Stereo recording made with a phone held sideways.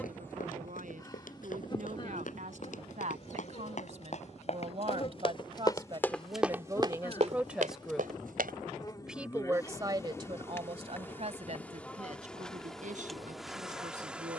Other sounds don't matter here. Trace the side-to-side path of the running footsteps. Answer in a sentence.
In this clip you hear the running footsteps move from left to right.